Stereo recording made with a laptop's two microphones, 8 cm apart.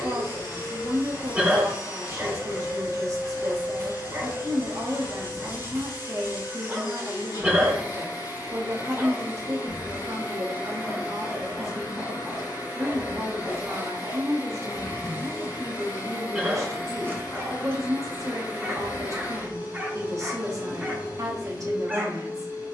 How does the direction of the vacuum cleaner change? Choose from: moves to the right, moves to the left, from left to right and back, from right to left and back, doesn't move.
doesn't move.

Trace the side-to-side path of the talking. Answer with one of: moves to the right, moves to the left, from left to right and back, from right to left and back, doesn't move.
doesn't move.